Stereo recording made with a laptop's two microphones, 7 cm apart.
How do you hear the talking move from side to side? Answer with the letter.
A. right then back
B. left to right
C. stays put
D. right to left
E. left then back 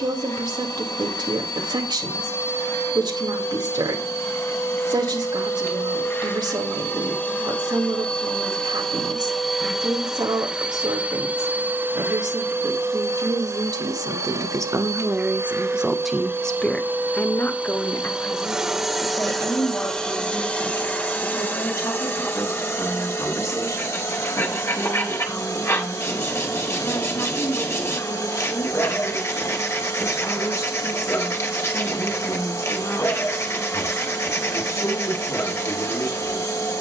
D.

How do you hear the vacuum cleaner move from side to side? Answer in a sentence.
You can hear the vacuum cleaner move from left to right and back again.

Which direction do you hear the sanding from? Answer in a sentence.
In this clip you hear the sanding on the left.